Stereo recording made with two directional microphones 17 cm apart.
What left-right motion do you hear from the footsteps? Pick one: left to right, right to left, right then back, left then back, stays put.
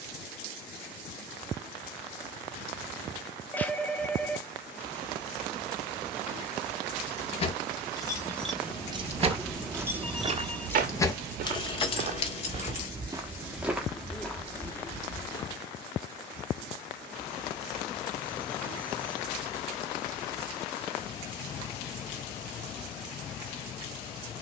right then back.